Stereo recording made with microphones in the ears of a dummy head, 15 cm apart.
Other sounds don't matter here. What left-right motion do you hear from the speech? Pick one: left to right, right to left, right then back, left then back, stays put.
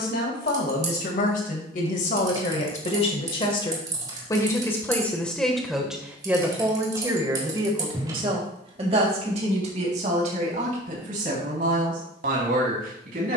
left to right.